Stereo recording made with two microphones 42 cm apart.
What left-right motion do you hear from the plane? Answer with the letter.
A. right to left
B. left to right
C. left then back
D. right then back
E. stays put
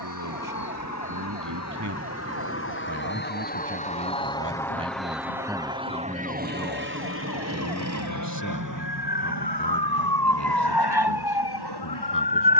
B.